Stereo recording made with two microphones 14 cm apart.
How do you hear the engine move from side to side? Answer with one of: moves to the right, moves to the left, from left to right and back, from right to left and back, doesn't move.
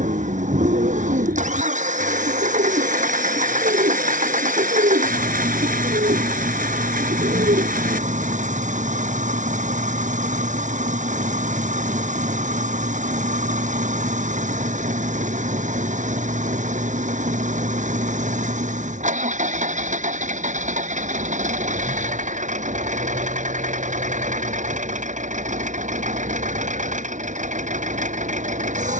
doesn't move.